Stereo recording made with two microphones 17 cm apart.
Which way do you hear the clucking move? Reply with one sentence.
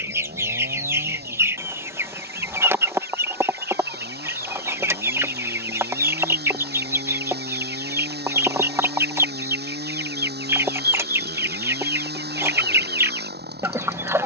In this clip you hear the clucking stay put.